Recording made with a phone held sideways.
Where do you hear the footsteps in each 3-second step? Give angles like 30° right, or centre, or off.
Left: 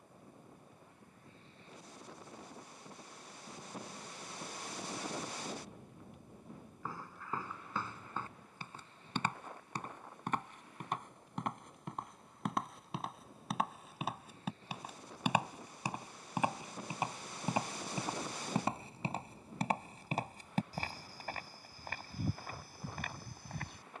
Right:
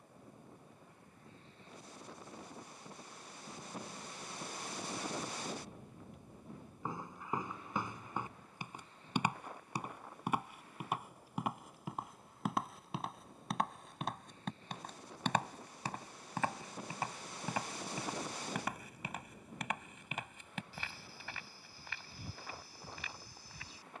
off, off, 20° right, 10° right, centre, 20° left, 30° left, 50° left.